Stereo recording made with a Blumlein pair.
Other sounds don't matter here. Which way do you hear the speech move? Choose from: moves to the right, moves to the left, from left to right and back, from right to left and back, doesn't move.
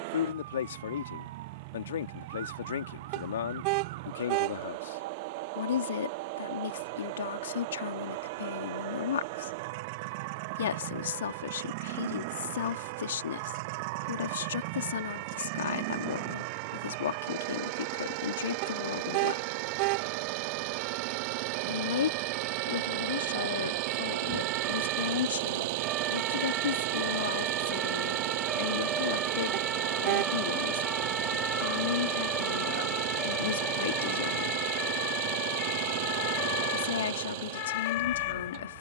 doesn't move.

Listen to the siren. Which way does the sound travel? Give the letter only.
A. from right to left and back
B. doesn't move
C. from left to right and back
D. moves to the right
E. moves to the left
E.